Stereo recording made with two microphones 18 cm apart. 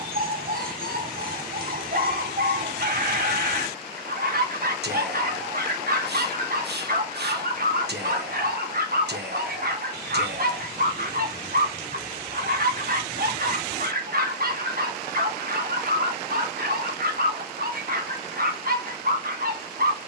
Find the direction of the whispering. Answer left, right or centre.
right.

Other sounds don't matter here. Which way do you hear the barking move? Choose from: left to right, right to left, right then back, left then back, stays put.
stays put.